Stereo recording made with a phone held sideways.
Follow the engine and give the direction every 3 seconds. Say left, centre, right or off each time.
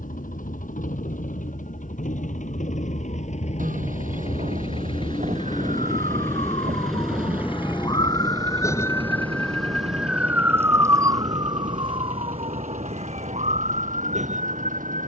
left, left, centre, right, right.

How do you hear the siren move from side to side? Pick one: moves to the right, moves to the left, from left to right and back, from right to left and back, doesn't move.
moves to the right.